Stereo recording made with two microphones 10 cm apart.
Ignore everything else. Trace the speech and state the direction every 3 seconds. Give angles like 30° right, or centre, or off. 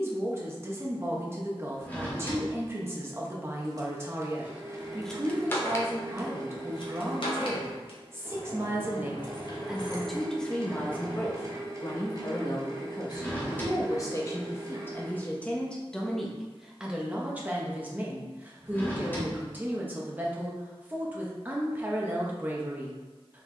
20° right, 20° right, 20° right, 10° left, 40° left, centre, 20° right, 20° right.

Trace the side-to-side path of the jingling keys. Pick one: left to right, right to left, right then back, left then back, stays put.
left then back.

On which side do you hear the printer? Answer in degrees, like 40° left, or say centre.
30° right.